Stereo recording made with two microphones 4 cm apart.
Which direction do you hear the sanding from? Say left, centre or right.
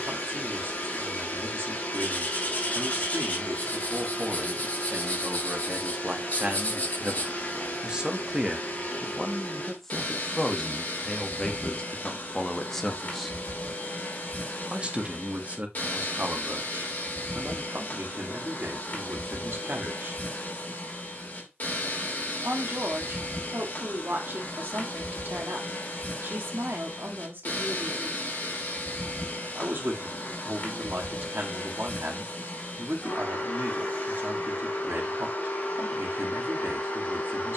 left.